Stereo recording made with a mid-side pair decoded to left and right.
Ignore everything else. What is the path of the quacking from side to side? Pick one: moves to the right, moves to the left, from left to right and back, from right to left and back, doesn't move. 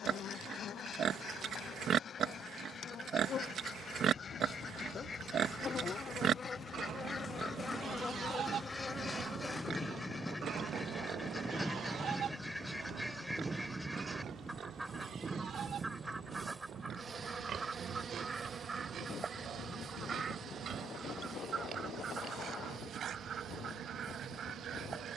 moves to the right.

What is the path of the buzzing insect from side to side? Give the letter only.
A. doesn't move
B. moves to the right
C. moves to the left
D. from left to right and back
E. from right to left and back
B.